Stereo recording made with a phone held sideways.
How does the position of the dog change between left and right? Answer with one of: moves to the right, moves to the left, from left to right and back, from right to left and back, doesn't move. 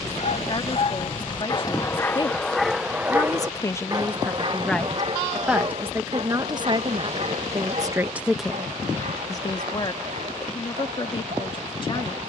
moves to the right.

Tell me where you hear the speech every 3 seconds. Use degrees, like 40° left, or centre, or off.
40° left, 10° left, 30° right, 40° left.